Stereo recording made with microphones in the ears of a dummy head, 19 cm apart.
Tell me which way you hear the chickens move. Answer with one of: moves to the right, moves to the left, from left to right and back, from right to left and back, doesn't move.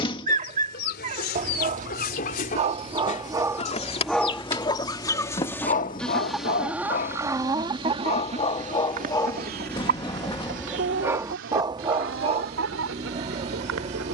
moves to the right.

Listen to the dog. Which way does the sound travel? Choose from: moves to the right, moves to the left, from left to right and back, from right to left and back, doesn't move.
from right to left and back.